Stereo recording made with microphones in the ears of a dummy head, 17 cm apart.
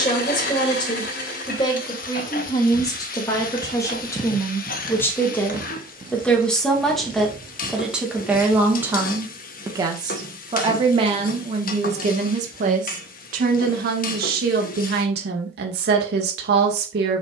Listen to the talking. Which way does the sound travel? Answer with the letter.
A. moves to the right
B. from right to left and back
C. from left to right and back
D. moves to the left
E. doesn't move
A.